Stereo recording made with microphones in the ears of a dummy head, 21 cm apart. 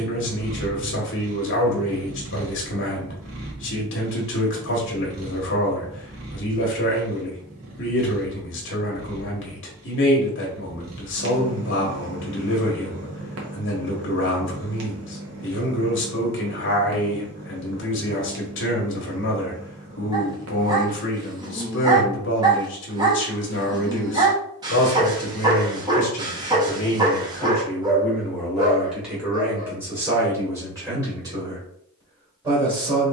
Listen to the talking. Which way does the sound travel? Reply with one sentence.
You can hear the talking go from the left side to the right.